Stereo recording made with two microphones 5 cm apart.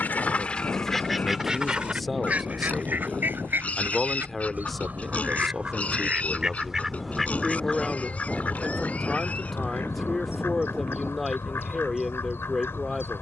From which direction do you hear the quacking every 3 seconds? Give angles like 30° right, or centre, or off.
10° right, 40° right, 10° left, 60° left, 60° left.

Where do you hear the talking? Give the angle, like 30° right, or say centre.
centre.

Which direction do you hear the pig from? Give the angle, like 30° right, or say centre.
30° left.